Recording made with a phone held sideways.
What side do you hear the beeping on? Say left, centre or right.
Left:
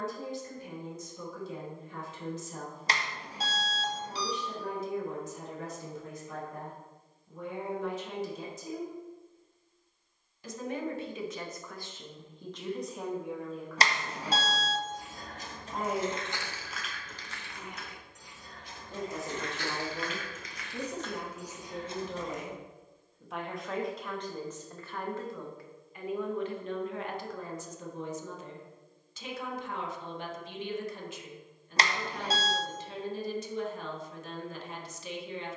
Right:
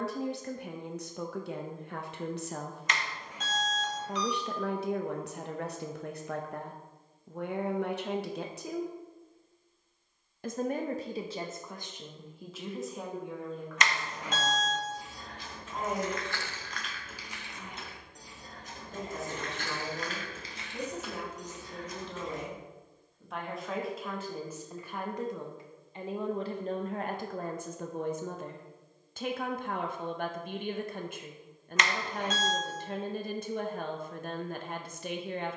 left.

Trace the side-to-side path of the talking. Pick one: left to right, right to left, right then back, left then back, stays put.
left then back.